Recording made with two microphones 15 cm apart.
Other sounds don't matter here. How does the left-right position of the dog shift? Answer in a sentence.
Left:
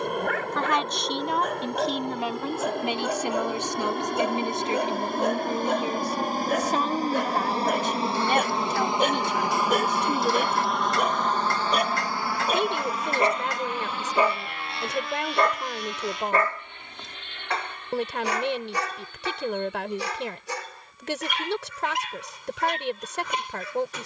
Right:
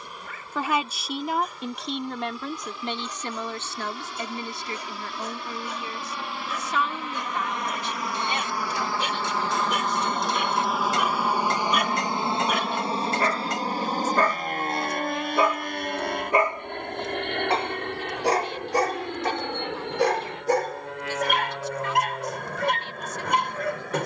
In this clip you hear the dog move to the right.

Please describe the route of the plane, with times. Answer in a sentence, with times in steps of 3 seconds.
In this clip you hear the plane on the left from 0 s, in the centre from 9 s and on the right from 12 s.